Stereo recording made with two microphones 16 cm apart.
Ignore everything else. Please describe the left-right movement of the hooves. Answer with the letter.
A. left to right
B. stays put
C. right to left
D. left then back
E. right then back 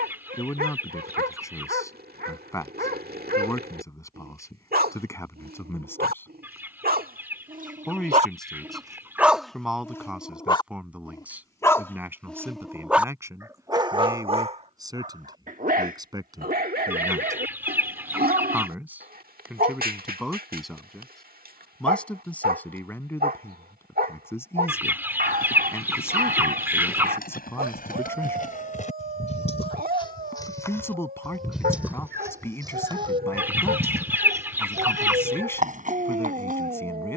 A.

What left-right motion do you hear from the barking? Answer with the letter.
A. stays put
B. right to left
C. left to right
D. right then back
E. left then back
E.